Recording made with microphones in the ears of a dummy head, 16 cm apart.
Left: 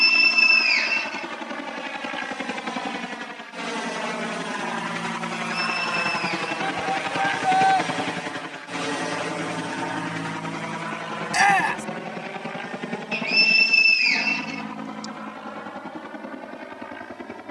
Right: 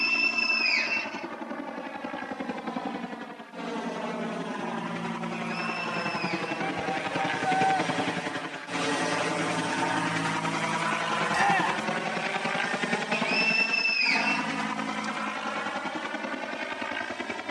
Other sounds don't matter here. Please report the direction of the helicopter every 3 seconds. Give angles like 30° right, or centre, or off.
60° left, 50° left, 20° left, 20° right, 50° right, 60° right.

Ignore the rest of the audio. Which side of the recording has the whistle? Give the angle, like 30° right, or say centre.
20° left.